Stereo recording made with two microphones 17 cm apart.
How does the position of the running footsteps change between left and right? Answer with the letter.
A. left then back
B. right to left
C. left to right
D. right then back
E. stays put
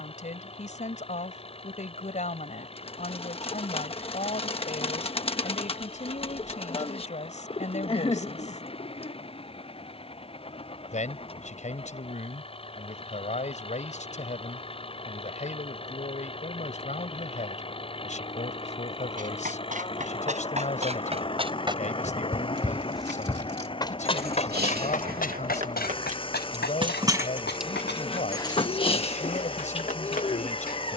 B.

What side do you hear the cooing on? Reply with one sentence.
You can hear the cooing on the left.